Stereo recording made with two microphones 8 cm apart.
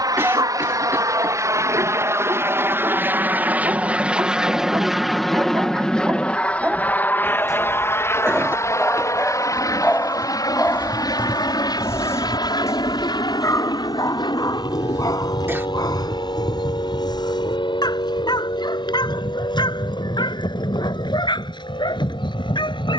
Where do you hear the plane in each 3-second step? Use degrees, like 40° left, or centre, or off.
40° right, 10° right, 20° left, 40° left, 50° left, 60° left, 70° left, 70° left.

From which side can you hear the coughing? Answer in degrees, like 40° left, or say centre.
30° right.